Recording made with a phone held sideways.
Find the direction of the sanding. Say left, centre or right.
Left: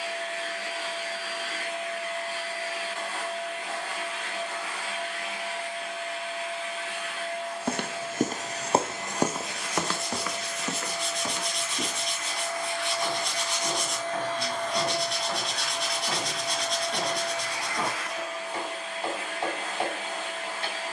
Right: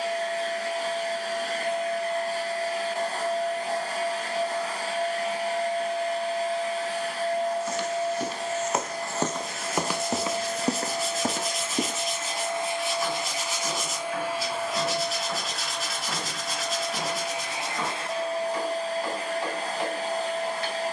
centre.